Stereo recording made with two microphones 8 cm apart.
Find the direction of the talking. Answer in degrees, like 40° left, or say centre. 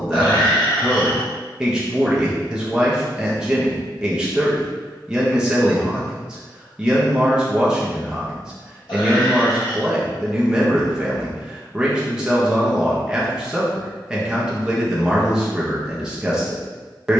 10° right.